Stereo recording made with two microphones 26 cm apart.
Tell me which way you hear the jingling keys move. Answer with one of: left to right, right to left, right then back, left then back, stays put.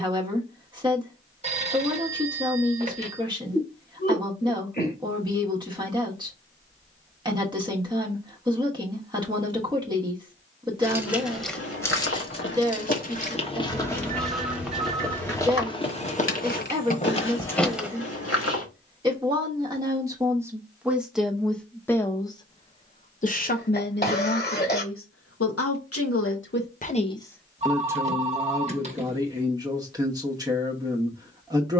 left then back.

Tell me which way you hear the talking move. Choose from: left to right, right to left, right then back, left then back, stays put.
left then back.